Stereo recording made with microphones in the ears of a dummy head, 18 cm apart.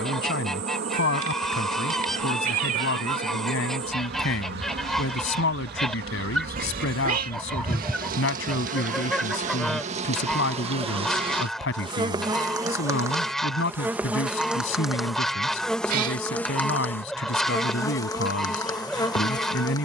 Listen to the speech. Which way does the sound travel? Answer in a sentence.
You can hear the speech stay in one place.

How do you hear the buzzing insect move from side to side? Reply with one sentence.
In this clip you hear the buzzing insect travel towards the left.